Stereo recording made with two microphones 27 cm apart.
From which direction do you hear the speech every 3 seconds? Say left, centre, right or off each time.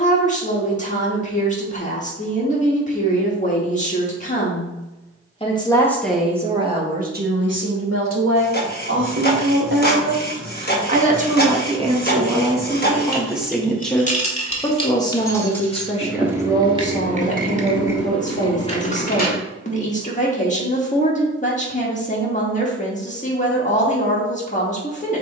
left, left, right, right, centre, left, left, left, left.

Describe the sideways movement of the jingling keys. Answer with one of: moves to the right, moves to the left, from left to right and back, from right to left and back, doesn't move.
from left to right and back.